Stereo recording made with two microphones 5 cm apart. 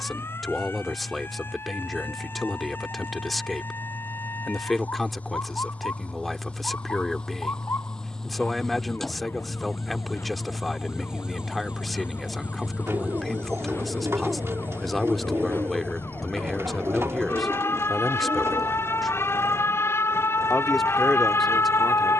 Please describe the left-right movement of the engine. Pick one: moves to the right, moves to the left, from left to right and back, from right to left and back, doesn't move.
moves to the right.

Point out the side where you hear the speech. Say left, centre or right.
centre.